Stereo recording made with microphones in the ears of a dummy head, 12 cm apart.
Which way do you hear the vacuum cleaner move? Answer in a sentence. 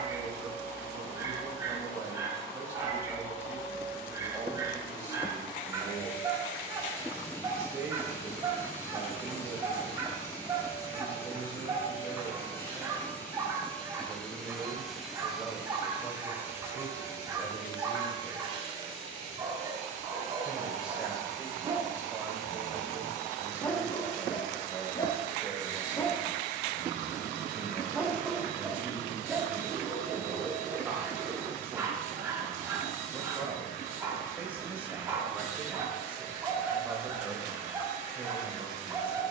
In this clip you hear the vacuum cleaner go from the left side to the right.